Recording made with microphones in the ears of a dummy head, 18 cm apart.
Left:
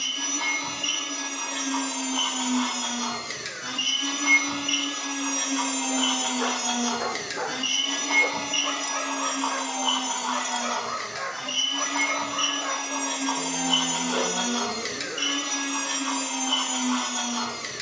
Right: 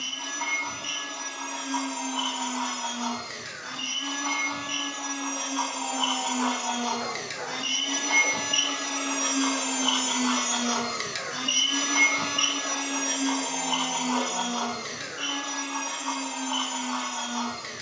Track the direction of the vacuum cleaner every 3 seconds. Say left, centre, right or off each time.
left, left, centre, right, centre, left.